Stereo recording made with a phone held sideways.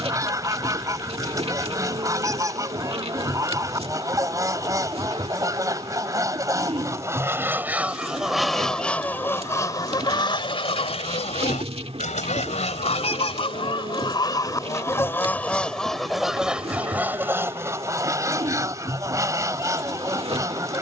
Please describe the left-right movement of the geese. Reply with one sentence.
You can hear the geese go left and come back.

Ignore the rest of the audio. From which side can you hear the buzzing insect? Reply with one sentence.
You can hear the buzzing insect on the right.